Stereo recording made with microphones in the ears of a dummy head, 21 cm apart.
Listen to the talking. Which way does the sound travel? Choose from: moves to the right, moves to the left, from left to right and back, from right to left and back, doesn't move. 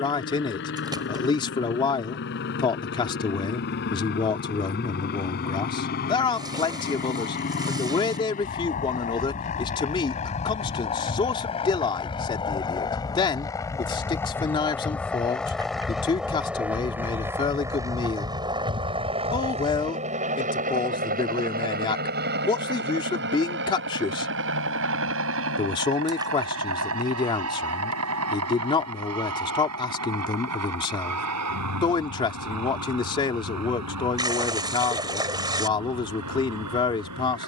doesn't move.